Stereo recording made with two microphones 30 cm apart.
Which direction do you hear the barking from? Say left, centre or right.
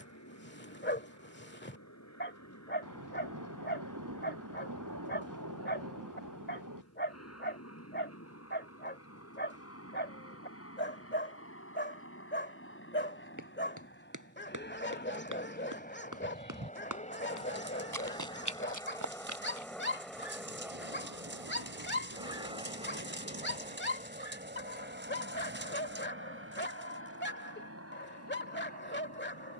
left.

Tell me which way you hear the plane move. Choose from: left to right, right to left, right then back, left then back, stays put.
left to right.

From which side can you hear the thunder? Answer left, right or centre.
right.